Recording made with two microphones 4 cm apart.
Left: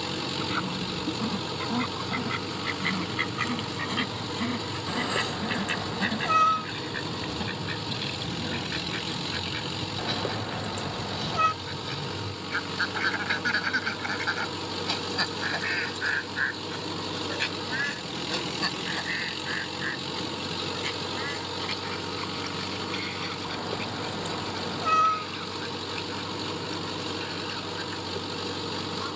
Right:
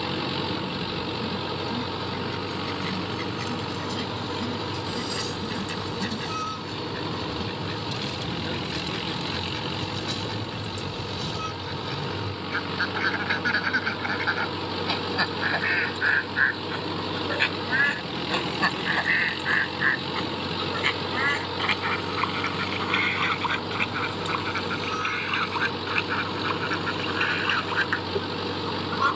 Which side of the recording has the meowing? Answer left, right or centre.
left.